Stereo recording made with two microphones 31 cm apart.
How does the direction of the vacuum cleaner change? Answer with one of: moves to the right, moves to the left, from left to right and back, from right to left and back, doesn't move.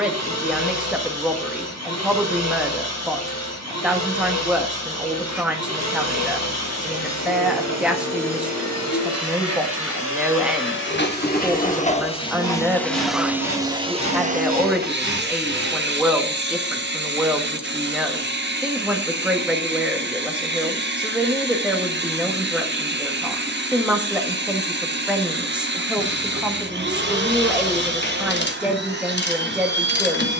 moves to the right.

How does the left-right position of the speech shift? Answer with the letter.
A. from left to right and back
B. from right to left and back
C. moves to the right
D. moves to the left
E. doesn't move
E.